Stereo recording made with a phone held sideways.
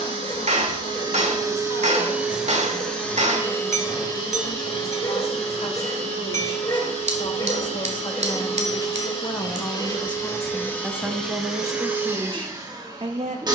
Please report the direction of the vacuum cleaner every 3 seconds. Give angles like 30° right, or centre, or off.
20° right, 30° left, 50° left, 20° left, 30° right.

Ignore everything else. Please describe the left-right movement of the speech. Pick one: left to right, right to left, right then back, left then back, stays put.
left to right.